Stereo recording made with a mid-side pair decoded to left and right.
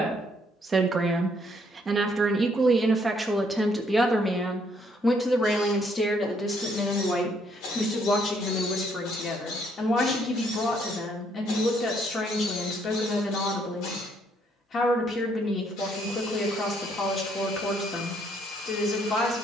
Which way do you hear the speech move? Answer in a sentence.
In this clip you hear the speech move from right to left.